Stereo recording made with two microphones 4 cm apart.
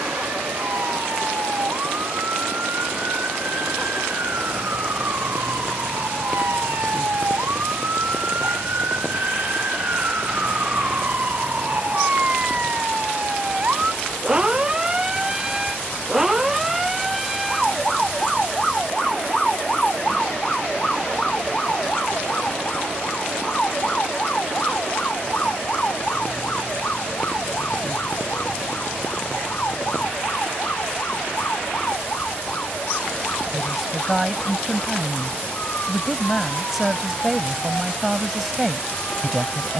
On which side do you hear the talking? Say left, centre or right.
centre.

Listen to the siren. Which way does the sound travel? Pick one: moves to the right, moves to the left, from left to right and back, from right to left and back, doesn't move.
moves to the left.